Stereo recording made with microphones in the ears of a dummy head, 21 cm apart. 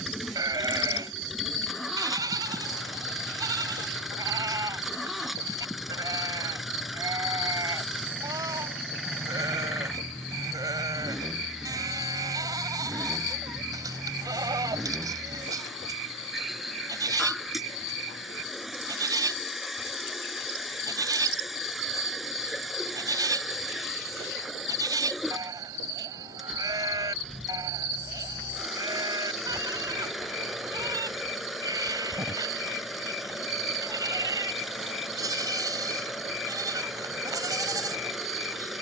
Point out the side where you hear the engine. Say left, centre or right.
centre.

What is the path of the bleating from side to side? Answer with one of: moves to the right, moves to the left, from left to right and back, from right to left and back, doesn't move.
doesn't move.